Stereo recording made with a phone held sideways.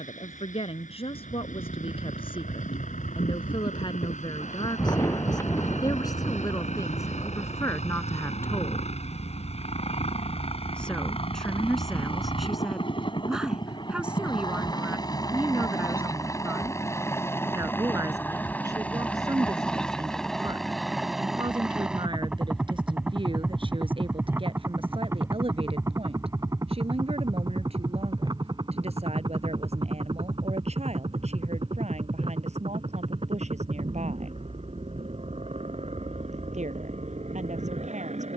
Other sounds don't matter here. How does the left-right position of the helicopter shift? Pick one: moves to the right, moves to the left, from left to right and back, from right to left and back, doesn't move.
moves to the right.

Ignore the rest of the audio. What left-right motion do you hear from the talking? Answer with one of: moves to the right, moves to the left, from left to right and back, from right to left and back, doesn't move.
moves to the right.